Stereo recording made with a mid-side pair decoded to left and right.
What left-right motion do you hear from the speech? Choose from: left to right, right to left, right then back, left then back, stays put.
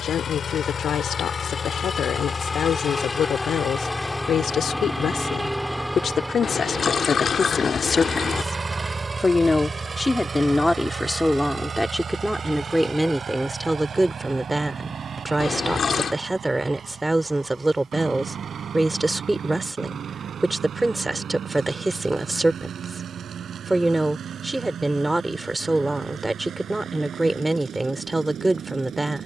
left to right.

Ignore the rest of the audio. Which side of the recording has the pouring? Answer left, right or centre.
left.